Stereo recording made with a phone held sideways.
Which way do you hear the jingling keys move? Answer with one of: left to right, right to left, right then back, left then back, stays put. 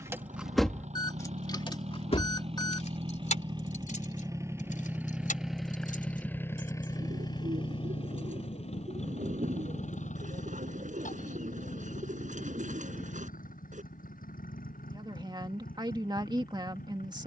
right to left.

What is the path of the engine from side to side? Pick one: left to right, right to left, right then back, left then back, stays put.
right to left.